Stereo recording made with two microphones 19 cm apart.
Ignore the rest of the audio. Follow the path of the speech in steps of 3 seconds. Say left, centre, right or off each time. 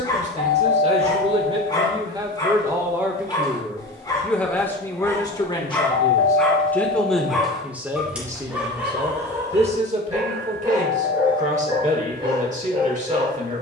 right, centre, centre, right, right.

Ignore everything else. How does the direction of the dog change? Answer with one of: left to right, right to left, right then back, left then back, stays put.
left to right.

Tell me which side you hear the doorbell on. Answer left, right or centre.
left.